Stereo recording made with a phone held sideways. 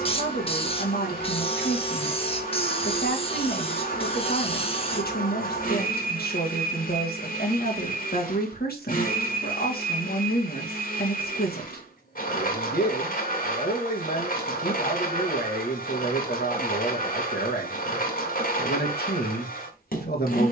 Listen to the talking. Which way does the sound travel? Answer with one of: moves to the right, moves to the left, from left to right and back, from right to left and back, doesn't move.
doesn't move.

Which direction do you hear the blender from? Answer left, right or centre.
left.